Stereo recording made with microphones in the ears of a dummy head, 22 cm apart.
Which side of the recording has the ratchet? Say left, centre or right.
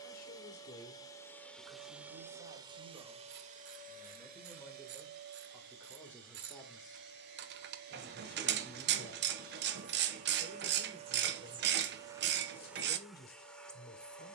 right.